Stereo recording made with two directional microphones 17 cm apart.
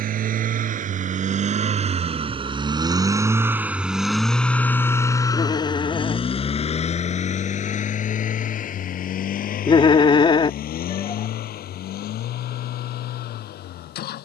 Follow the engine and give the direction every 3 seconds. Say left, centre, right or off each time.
right, centre, left, left, left.